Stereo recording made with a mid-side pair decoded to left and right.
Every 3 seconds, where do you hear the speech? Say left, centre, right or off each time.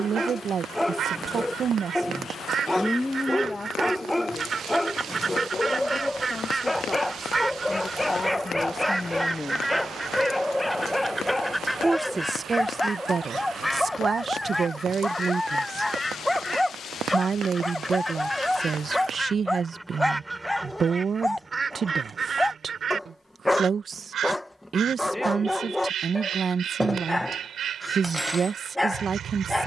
right, left, left, centre, right, right, right, right, right, right.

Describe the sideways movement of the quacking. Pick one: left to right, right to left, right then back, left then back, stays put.
left then back.